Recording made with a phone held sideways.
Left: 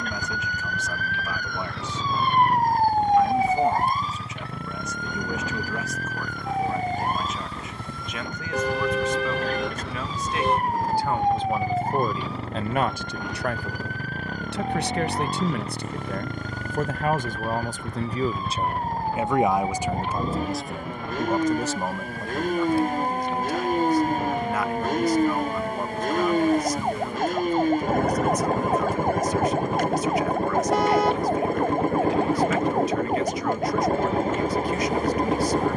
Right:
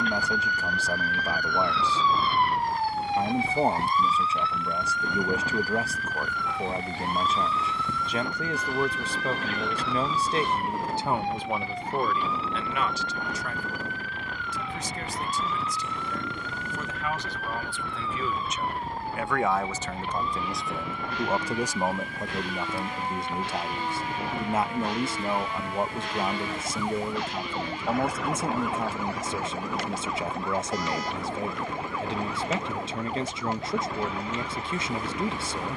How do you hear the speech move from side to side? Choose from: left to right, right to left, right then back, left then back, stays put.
left then back.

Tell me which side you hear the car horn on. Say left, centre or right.
left.